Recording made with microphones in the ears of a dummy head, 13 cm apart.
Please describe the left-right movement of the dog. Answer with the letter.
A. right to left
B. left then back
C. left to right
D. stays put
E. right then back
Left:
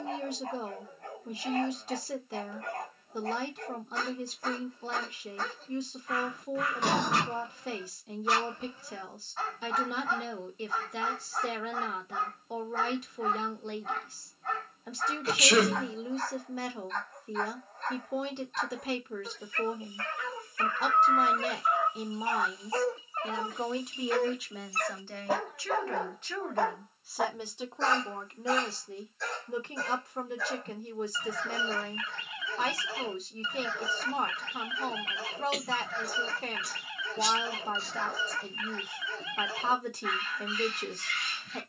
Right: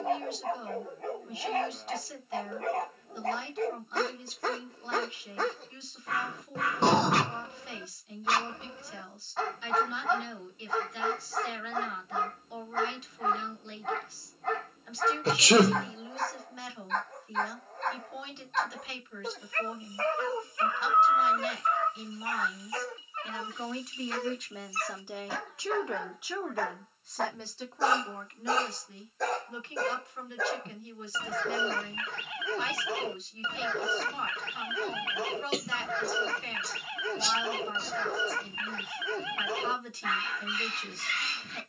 B.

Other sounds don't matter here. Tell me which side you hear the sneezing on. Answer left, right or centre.
right.